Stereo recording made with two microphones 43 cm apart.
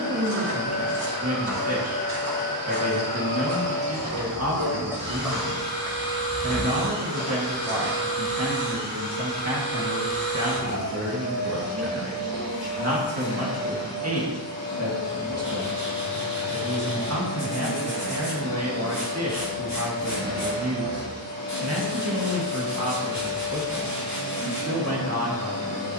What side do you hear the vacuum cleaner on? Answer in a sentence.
You can hear the vacuum cleaner on the left.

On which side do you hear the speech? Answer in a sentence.
In this clip you hear the speech on the right.